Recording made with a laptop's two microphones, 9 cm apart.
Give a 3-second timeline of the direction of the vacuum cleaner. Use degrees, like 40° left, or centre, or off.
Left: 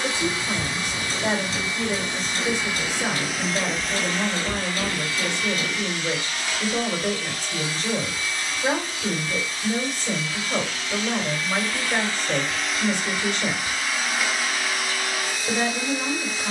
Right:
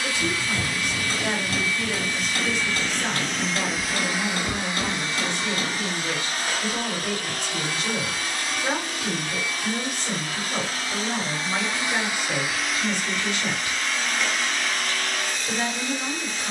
20° left, 20° right, 50° right, 40° right, centre, 10° left.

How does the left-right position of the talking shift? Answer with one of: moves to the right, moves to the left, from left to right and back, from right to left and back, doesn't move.
doesn't move.